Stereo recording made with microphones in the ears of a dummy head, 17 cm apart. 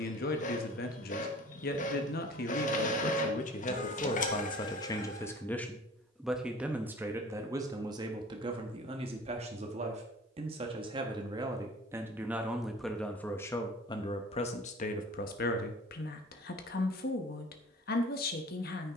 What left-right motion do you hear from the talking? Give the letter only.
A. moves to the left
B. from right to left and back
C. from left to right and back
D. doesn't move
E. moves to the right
C.